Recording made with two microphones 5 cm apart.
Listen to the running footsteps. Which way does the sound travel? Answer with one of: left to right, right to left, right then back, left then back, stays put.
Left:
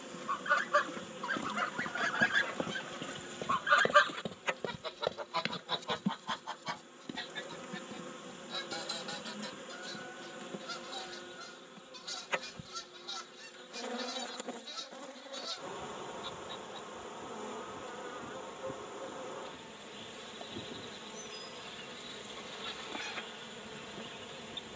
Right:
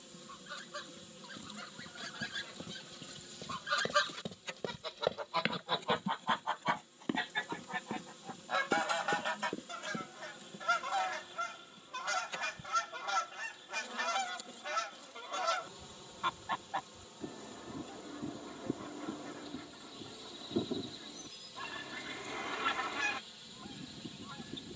left to right.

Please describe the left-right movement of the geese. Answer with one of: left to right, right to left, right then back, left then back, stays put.
left to right.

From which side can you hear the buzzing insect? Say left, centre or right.
left.